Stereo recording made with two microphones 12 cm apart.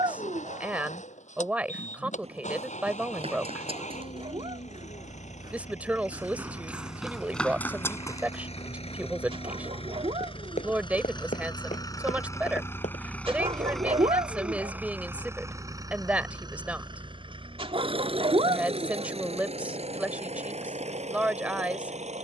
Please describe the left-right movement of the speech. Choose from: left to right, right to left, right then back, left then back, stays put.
stays put.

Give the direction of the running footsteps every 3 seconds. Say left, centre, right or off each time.
right, right, centre, left, left, off, off, off.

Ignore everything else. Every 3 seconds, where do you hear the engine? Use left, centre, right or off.
left, left, left, left, centre, right, right, right.